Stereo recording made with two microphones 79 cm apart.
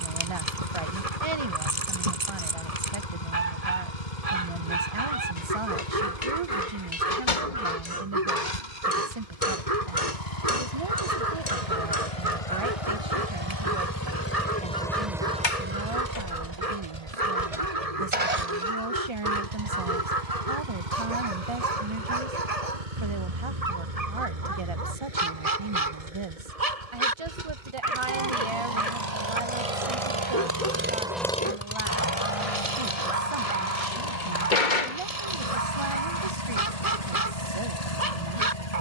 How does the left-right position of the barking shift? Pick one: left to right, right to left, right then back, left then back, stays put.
stays put.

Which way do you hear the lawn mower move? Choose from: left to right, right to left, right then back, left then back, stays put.
right then back.